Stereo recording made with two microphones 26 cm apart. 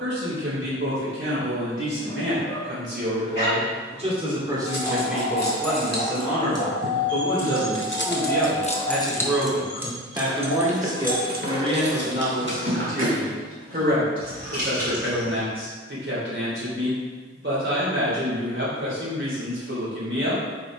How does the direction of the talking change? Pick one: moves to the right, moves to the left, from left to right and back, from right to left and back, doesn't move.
from right to left and back.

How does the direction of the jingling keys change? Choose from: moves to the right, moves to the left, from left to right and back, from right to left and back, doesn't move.
moves to the right.